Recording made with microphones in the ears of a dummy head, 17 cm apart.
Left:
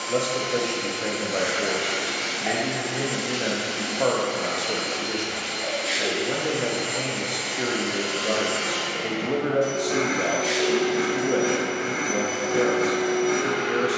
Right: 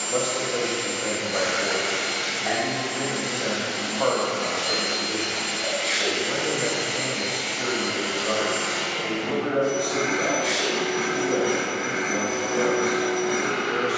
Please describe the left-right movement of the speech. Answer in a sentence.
You can hear the speech stay in one place.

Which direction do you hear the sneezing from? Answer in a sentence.
You can hear the sneezing in the centre.